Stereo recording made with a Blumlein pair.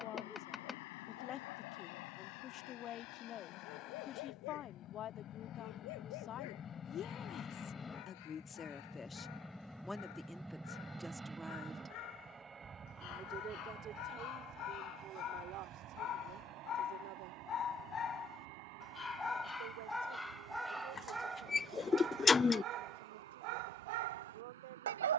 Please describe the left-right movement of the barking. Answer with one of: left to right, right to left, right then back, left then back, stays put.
left to right.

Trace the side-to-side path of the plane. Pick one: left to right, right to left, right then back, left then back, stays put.
left to right.